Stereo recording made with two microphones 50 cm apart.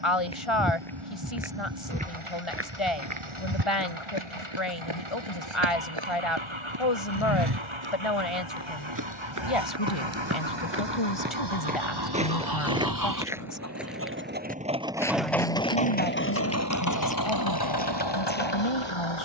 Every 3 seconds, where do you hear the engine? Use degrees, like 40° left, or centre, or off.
80° right, 70° right, 70° right, 60° right, 30° right, 30° left, 60° left.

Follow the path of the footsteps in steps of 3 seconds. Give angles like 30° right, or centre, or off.
10° right, 60° right, 50° right, 30° right, 10° right, 10° left, 20° left.